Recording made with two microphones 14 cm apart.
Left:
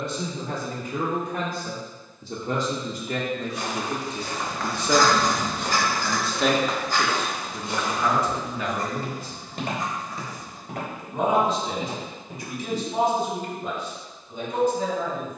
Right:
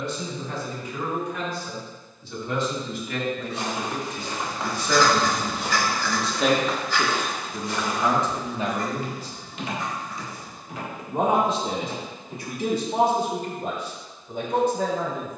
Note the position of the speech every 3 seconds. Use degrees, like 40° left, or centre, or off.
50° left, 30° left, 10° right, 50° right, 60° right.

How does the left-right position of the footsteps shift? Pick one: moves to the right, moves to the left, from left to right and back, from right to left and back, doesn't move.
moves to the left.